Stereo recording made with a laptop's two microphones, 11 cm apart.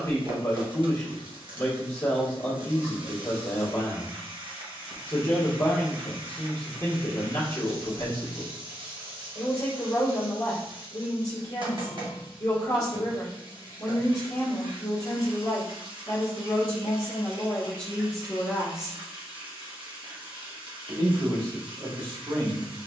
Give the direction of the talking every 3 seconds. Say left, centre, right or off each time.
left, left, left, left, left, left, centre, right.